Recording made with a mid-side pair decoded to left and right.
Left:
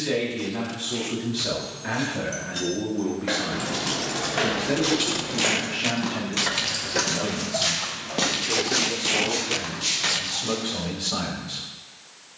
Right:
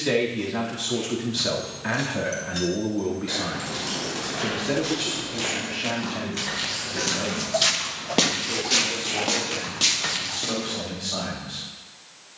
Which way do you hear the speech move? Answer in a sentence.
In this clip you hear the speech move to the left.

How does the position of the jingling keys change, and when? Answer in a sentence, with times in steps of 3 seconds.
In this clip you hear the jingling keys in the centre from 0 s, on the left from 3 s and in the centre from 9 s.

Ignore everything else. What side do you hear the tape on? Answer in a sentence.
In this clip you hear the tape on the left.